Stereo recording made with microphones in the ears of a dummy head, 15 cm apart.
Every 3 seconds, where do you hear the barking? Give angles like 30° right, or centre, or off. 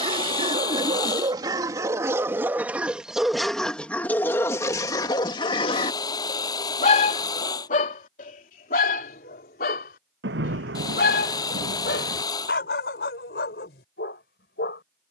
20° right, 20° left, 50° left, 70° left, 80° left.